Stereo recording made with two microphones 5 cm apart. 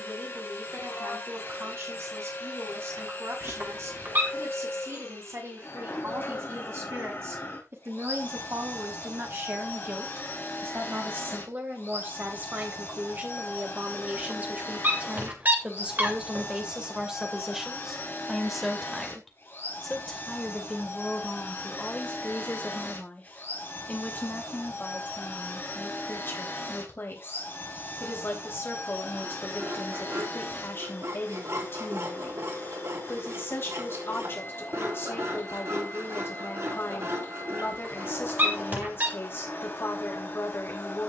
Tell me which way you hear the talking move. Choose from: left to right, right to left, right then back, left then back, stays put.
right to left.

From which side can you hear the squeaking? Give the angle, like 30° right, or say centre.
40° right.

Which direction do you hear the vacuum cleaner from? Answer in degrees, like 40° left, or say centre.
40° left.